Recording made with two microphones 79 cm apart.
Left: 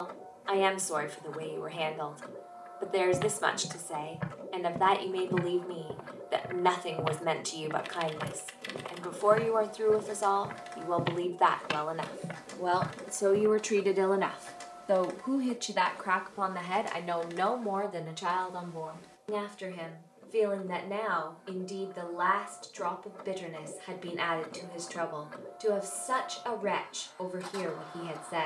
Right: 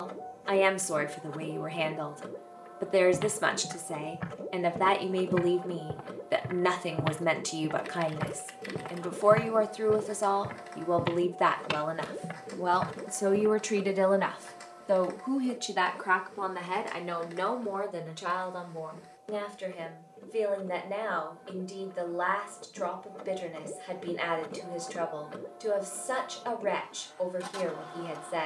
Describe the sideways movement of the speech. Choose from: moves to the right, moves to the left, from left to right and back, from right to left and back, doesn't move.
moves to the left.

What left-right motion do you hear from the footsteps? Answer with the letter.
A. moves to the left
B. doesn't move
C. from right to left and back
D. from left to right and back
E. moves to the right
D.